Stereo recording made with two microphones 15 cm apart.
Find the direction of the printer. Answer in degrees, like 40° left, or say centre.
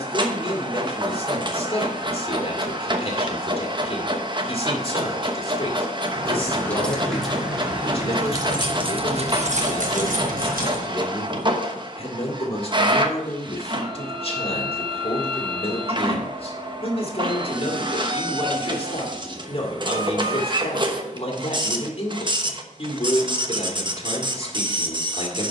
30° right.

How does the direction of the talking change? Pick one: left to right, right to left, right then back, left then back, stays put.
stays put.